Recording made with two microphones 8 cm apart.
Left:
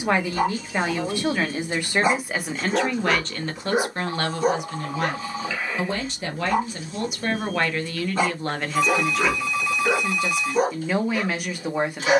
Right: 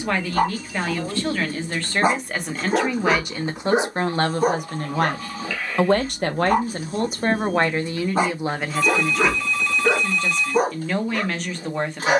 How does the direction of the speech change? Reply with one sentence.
You can hear the speech go right and come back.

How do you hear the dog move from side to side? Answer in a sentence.
In this clip you hear the dog stay put.